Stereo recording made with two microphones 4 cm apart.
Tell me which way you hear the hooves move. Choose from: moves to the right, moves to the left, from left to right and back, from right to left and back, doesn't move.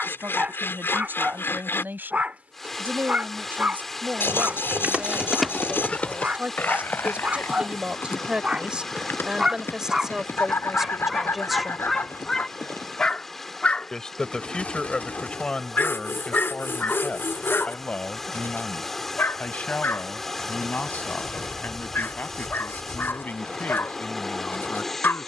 moves to the left.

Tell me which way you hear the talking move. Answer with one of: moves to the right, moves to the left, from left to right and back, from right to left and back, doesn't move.
moves to the left.